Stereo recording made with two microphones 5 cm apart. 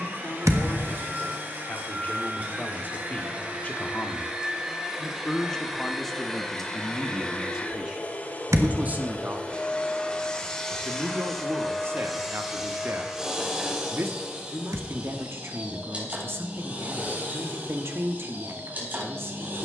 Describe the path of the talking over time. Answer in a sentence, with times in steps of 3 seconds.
You can hear the talking on the left from 0 s, in the centre from 6 s and on the right from 9 s.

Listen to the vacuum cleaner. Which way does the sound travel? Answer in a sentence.
You can hear the vacuum cleaner move from right to left and back again.